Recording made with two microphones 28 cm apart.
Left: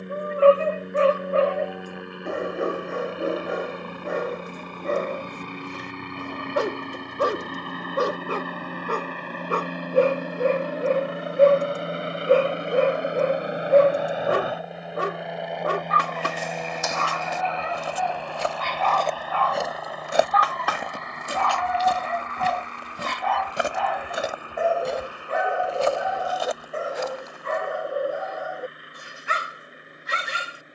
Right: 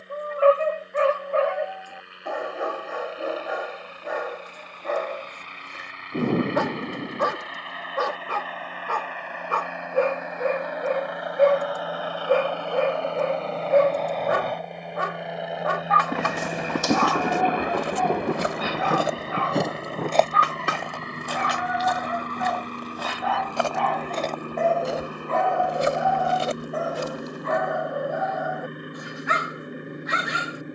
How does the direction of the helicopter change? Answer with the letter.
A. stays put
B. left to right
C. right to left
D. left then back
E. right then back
B.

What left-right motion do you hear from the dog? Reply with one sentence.
You can hear the dog go right and come back.